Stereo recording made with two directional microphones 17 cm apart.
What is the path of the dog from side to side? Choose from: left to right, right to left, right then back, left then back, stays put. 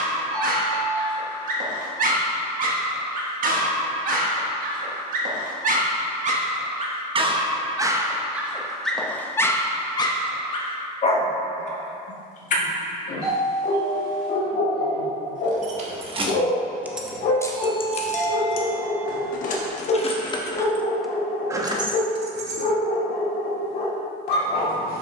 right to left.